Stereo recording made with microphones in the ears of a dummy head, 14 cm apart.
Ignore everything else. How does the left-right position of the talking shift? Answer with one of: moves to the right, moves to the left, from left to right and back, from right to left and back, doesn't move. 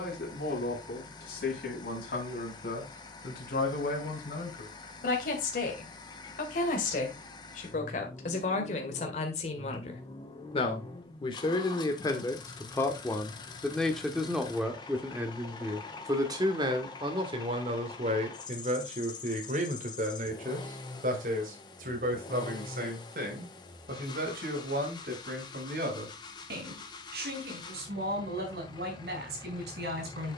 moves to the right.